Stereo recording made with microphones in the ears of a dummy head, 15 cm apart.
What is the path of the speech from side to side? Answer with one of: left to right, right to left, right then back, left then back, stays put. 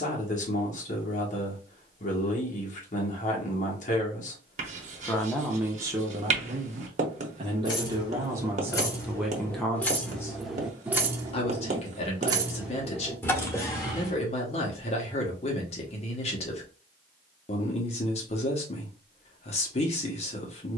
right then back.